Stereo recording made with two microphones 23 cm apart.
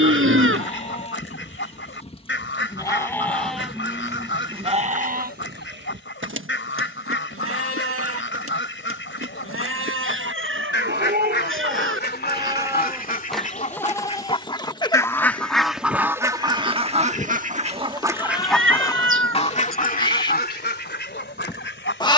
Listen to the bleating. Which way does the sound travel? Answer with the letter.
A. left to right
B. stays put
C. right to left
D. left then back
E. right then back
E.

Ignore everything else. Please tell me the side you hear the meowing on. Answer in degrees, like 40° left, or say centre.
60° right.